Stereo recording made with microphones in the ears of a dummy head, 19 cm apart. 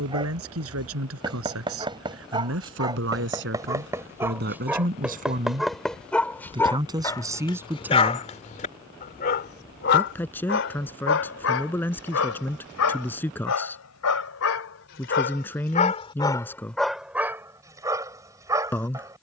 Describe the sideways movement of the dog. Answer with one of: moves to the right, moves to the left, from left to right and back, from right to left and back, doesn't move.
from right to left and back.